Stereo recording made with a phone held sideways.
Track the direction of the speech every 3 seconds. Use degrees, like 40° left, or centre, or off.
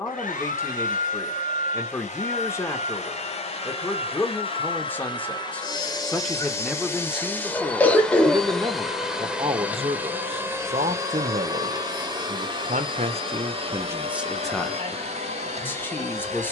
20° left, 10° left, 10° right, 50° right, 30° right, 10° left.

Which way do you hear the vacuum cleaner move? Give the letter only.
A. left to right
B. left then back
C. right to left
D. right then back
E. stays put
A.